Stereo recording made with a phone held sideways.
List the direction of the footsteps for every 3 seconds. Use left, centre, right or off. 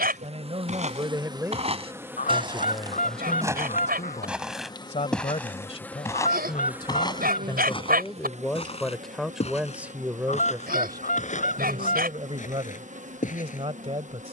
right, centre, left, left, left.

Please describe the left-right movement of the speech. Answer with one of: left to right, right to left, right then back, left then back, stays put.
left then back.